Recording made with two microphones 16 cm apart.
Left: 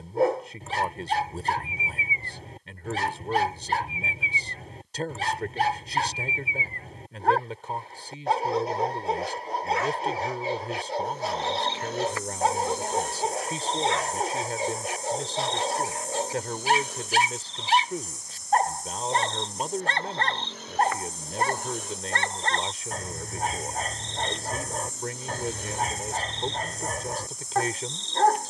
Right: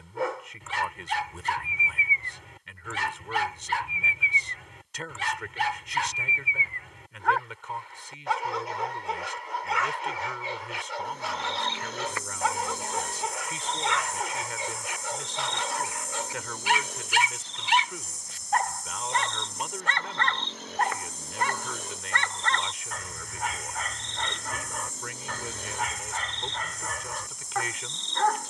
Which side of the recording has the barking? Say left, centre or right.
left.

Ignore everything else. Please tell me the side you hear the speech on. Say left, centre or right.
left.